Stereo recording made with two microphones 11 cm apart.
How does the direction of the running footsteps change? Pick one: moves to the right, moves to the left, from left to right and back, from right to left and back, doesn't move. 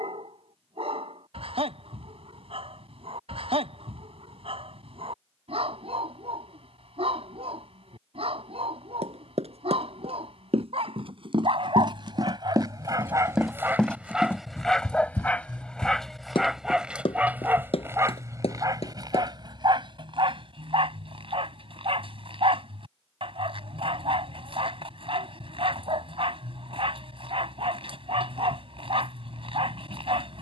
moves to the left.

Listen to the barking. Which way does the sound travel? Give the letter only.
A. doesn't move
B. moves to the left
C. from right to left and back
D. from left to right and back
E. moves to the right
C.